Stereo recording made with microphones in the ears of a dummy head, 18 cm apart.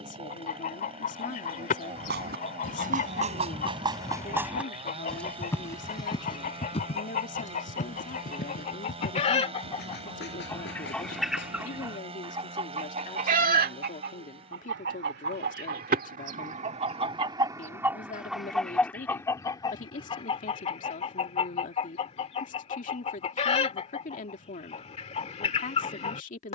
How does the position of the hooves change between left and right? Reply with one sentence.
You can hear the hooves move from right to left.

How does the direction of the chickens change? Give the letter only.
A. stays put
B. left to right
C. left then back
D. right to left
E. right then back
E.